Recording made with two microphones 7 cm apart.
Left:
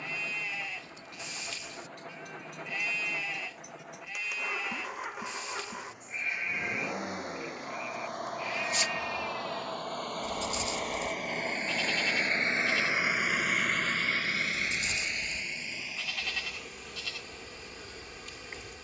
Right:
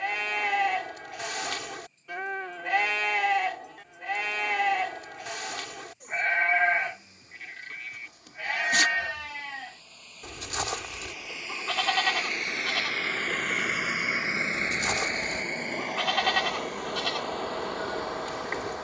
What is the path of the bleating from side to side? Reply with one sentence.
In this clip you hear the bleating stay in one place.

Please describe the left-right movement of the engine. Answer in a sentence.
In this clip you hear the engine move to the right.